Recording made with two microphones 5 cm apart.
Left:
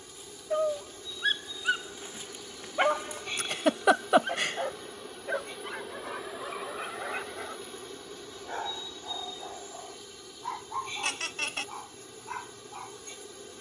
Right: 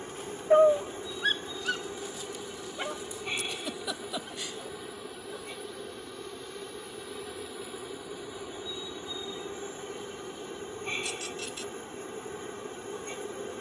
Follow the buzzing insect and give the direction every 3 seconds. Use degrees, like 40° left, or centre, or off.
30° right, 10° right, centre, 30° right, 30° right.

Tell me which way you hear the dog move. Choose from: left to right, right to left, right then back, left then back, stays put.
right to left.